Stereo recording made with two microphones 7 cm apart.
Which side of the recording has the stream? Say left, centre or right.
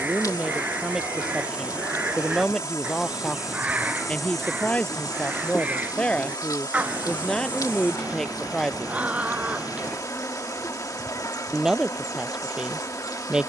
left.